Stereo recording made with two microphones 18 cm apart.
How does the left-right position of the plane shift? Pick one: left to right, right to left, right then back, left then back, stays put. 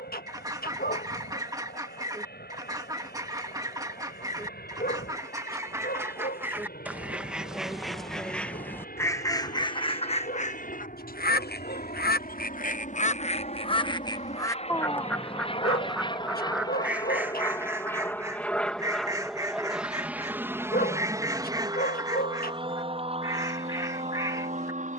left to right.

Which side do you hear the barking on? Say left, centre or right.
left.